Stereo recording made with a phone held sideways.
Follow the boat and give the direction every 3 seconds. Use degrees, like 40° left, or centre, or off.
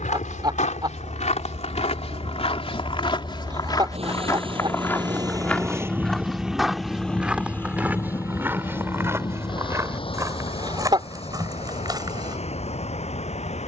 70° right, 40° right, 10° left, 40° left, 60° left.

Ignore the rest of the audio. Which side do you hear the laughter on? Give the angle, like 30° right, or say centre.
30° right.